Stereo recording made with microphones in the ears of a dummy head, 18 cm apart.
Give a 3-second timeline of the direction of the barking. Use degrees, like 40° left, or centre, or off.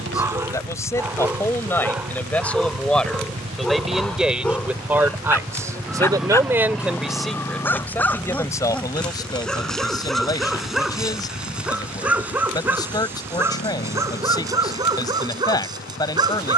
10° right, centre, 10° left, centre, 10° right, 20° right.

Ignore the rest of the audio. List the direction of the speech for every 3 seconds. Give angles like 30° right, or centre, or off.
10° left, 10° right, centre, 20° left, 20° left, 20° left.